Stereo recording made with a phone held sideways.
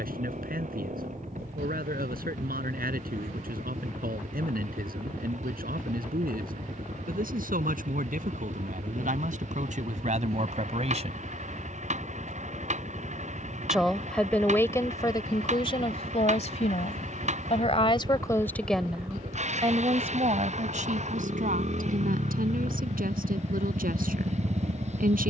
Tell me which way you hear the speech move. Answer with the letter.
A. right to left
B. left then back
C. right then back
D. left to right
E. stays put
B.